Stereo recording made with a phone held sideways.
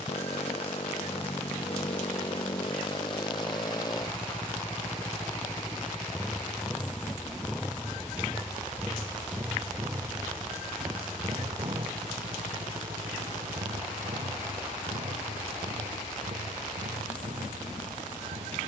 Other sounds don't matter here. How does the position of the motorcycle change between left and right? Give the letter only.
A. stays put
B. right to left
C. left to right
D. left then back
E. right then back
C.